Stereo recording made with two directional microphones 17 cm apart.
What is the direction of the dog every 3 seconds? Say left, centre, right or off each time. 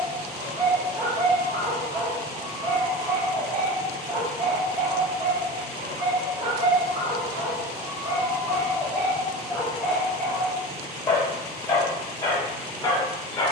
right, right, right, centre, left.